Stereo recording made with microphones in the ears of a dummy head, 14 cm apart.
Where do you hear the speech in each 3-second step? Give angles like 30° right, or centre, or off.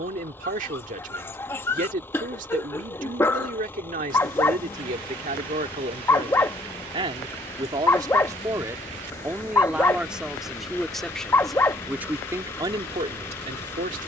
50° right, 50° right, 30° right, centre, 30° right.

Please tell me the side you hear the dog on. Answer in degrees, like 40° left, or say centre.
10° left.